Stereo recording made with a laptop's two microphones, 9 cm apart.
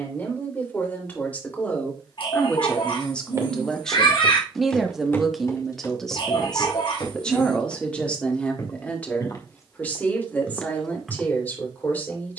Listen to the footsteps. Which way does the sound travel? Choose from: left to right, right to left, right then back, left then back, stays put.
left then back.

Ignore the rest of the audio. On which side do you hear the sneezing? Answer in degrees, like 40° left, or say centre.
70° left.